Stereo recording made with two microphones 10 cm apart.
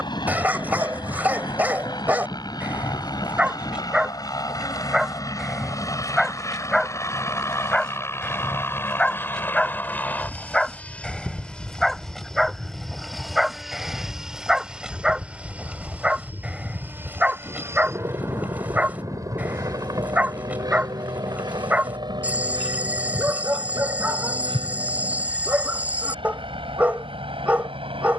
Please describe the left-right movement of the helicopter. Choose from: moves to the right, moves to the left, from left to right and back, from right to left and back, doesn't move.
moves to the right.